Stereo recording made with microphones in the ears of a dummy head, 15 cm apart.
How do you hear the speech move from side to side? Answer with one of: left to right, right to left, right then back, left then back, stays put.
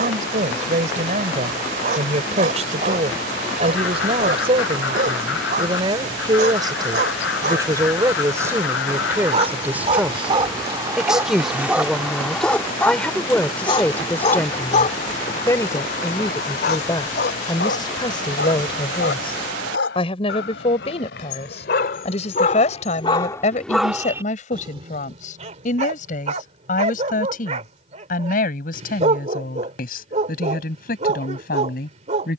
right to left.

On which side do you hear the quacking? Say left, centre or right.
left.